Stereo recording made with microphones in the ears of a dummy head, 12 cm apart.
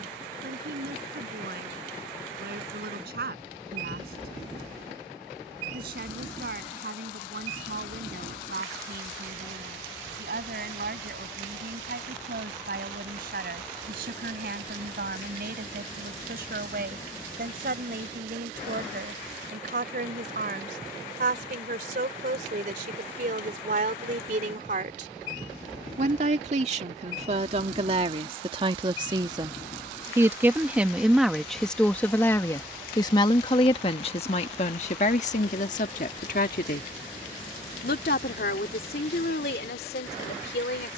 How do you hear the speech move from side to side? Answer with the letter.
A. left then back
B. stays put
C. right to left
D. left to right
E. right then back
C.